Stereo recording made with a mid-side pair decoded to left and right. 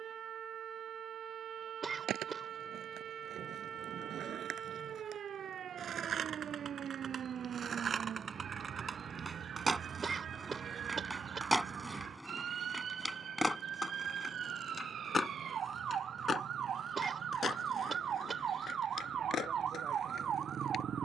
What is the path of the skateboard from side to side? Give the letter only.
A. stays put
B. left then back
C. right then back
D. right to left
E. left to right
D.